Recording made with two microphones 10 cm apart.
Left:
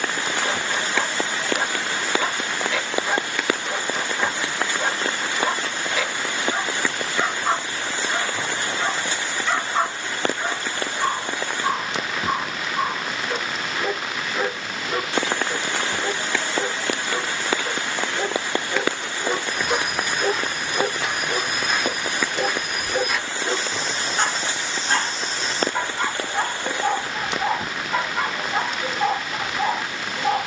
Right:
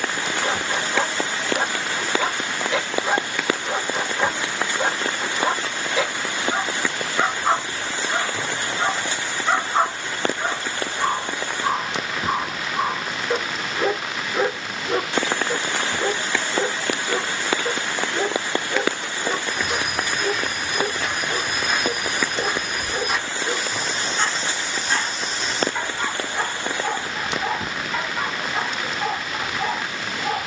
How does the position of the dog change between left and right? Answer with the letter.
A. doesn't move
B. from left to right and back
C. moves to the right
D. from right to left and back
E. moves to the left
E.